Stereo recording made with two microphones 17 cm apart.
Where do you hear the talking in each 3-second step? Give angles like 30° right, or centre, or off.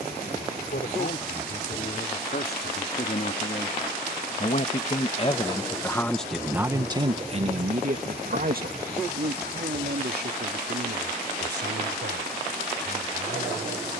70° left, 40° left, 30° right, 70° right, 80° right.